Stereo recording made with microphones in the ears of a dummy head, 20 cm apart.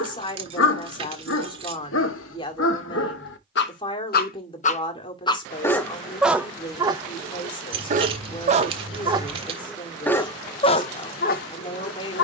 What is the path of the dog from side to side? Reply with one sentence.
In this clip you hear the dog move from left to right and back again.